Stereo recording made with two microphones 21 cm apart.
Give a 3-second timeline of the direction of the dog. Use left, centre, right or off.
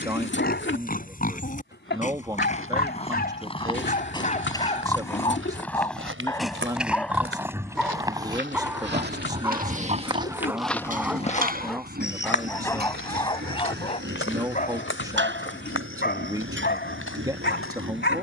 left, left, centre, centre, left, left.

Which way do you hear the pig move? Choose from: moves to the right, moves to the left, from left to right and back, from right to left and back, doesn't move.
moves to the right.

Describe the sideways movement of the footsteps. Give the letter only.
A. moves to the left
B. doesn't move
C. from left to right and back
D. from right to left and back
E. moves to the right
A.